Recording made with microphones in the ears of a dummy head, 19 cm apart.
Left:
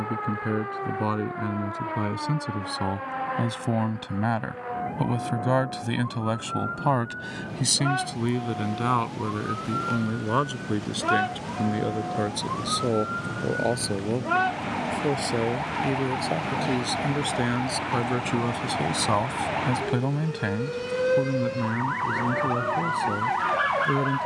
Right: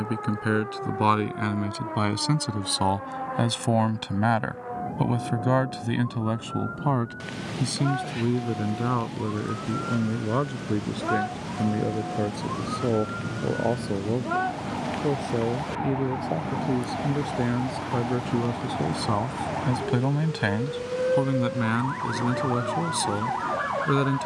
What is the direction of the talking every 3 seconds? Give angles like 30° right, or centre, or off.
40° right, 10° right, 40° left, 60° left, 70° left, 70° left, 30° left, 50° right.